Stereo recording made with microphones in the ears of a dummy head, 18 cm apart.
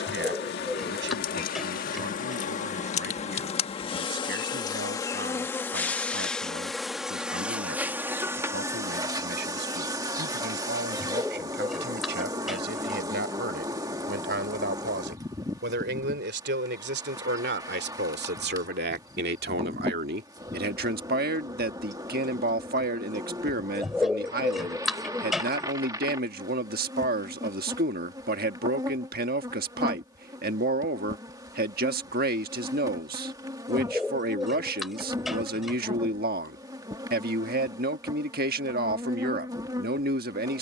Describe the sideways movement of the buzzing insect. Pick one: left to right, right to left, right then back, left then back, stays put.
left to right.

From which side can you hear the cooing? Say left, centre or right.
centre.